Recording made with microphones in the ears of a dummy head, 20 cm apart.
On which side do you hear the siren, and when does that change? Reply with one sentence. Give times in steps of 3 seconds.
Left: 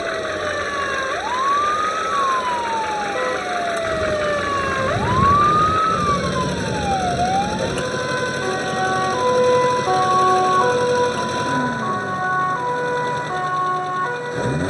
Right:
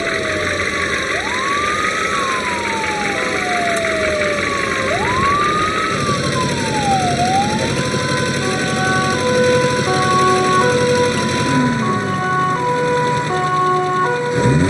In this clip you hear the siren on the left from 0 s, in the centre from 6 s and on the right from 9 s.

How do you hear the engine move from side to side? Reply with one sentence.
You can hear the engine stay in one place.